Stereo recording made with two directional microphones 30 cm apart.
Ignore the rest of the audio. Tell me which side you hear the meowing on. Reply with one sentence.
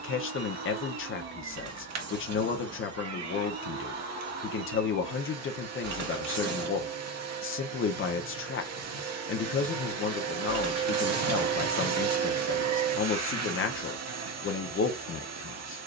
You can hear the meowing on the right.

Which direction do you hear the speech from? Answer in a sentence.
You can hear the speech on the left.